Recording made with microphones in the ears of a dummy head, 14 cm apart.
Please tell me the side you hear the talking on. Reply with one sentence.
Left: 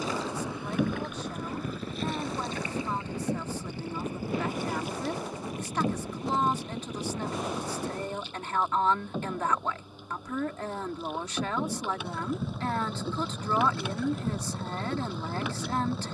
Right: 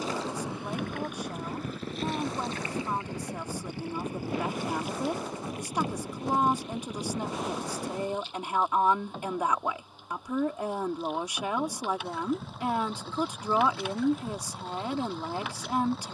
You can hear the talking in the centre.